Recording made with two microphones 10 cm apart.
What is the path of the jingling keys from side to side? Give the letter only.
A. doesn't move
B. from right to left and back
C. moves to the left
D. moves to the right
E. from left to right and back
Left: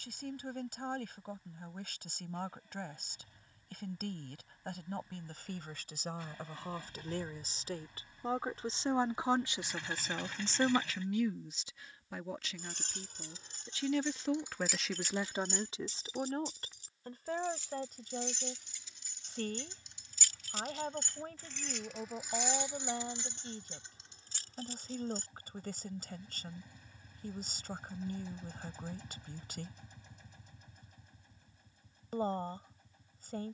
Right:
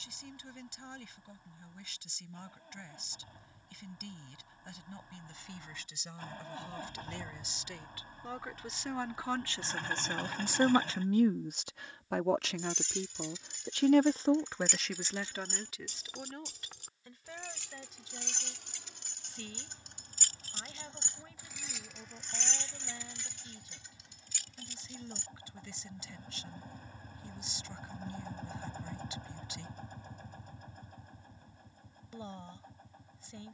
E.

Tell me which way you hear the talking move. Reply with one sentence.
In this clip you hear the talking move from left to right and back again.